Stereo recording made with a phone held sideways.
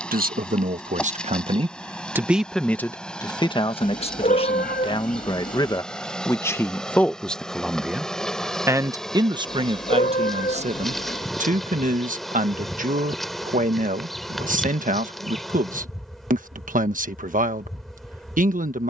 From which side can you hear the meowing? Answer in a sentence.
You can hear the meowing on the left.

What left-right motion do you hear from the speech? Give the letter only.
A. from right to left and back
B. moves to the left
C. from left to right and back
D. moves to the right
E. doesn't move
A.